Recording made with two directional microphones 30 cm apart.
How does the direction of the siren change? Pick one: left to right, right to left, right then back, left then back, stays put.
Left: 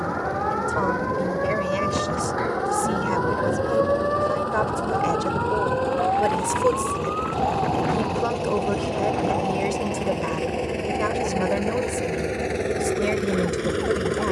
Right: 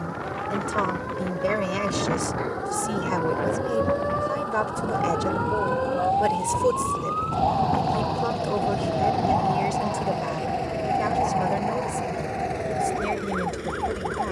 left to right.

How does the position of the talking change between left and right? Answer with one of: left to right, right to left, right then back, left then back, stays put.
right to left.